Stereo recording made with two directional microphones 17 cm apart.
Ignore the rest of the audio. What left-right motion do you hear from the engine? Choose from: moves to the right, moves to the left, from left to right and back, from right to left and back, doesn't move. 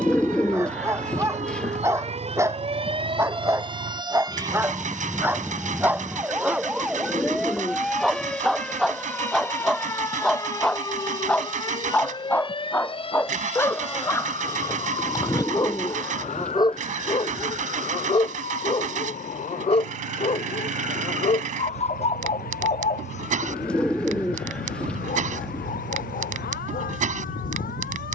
doesn't move.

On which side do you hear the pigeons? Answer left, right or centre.
centre.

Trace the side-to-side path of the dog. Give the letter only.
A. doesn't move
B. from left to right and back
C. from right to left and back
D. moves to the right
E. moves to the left
E.